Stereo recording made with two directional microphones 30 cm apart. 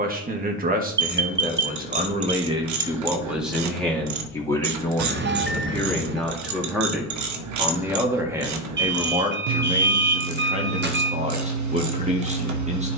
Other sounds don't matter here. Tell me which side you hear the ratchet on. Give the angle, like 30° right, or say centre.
70° right.